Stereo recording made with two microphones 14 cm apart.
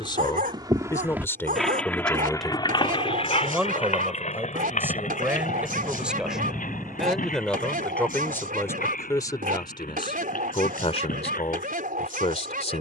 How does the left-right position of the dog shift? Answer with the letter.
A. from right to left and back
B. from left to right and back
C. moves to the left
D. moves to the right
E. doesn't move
E.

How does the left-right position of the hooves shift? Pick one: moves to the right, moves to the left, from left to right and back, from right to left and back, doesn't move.
moves to the left.